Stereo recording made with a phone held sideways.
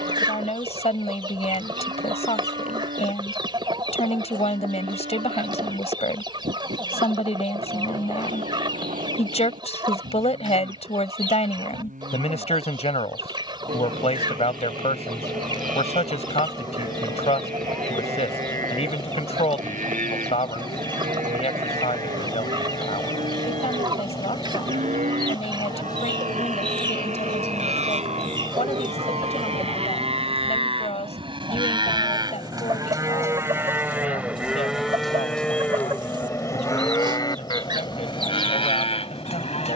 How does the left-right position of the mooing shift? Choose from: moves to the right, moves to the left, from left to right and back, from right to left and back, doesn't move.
moves to the left.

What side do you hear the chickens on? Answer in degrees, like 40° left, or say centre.
30° right.